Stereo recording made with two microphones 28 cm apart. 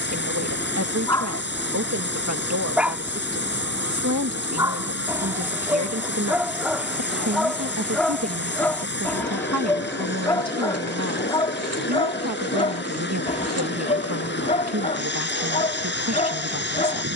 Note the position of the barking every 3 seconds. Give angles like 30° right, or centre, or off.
10° left, 10° right, centre, 10° left, 20° left, 20° left.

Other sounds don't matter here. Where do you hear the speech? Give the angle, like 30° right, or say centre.
70° right.